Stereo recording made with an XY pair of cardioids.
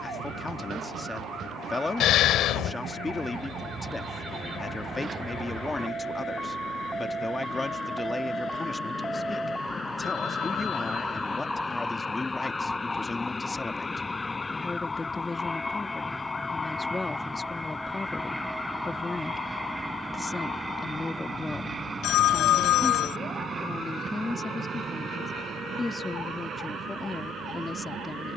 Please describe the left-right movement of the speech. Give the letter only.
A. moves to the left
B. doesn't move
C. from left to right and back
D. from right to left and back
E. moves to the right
B.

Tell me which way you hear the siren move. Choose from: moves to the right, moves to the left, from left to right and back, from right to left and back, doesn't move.
moves to the left.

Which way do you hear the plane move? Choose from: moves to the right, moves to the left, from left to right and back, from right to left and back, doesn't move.
moves to the right.